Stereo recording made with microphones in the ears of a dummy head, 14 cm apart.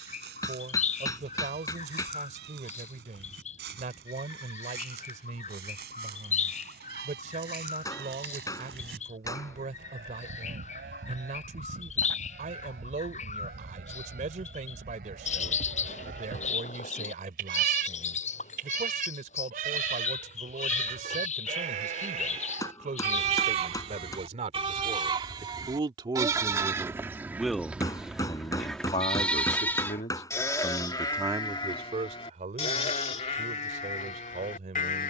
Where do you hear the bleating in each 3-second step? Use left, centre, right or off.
right, right, right, right, right, right, right, right, right, centre, left, left.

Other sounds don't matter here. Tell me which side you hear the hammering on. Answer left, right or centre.
left.